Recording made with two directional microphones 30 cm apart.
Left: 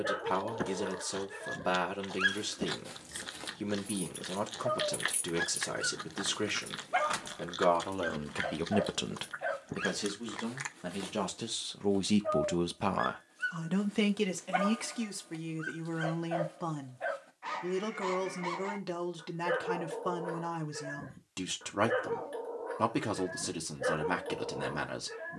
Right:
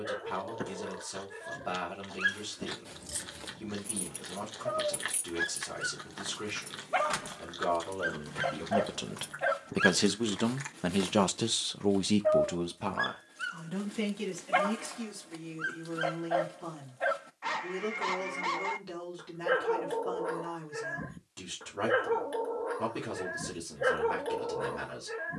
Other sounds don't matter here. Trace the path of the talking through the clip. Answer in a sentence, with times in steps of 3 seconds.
You can hear the talking on the left from 0 s, on the right from 9 s and on the left from 12 s.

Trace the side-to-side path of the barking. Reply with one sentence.
You can hear the barking go from the left side to the right.